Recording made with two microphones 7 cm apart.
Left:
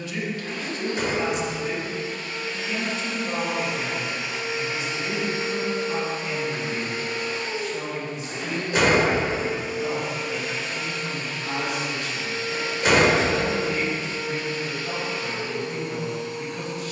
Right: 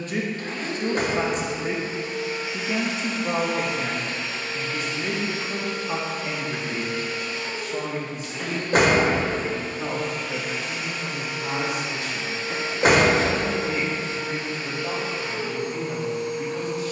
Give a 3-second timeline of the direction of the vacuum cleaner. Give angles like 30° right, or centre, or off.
30° right, 10° left, 30° left, centre, 30° right, 30° right.